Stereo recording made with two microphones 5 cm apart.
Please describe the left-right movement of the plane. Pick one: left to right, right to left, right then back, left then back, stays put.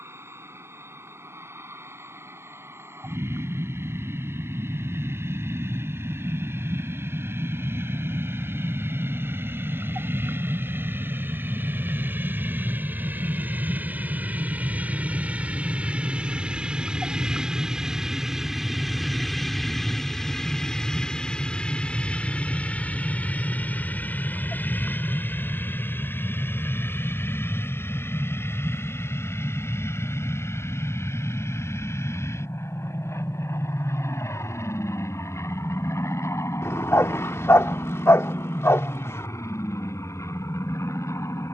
right to left.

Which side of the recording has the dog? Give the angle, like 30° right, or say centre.
70° left.